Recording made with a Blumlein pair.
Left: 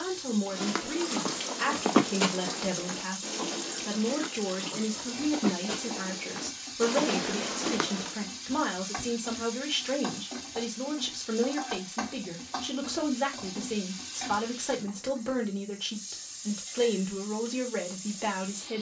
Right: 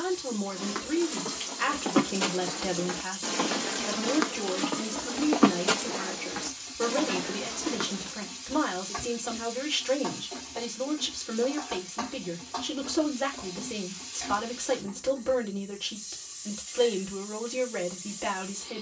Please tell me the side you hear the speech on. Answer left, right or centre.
centre.